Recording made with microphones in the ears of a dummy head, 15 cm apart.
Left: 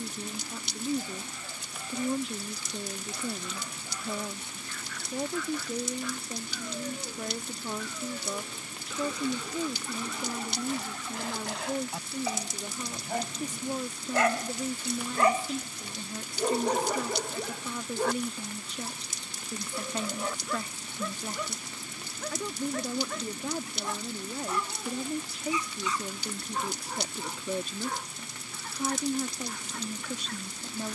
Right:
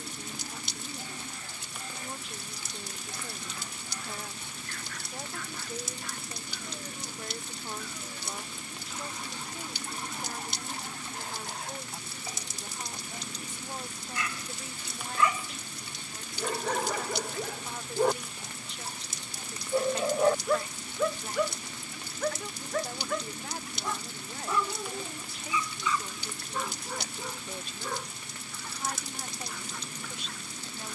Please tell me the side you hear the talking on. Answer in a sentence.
You can hear the talking on the left.